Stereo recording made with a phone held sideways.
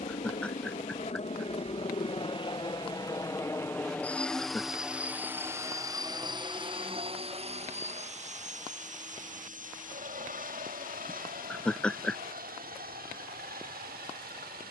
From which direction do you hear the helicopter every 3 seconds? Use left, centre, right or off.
left, centre, right, right, right.